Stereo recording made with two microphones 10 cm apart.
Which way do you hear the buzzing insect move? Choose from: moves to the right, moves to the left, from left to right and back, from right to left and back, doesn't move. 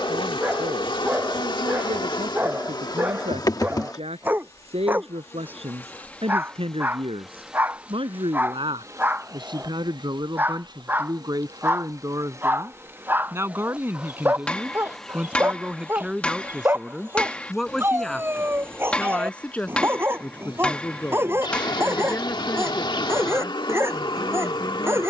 from left to right and back.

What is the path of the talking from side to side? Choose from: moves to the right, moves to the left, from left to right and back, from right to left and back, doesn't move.
moves to the left.